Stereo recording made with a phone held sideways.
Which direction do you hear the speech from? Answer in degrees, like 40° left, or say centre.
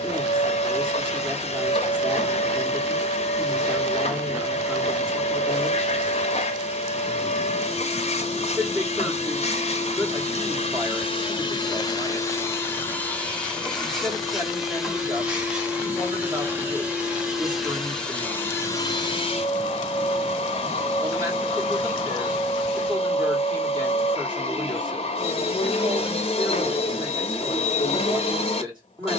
30° right.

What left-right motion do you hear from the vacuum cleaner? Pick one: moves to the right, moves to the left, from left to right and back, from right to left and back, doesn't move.
from left to right and back.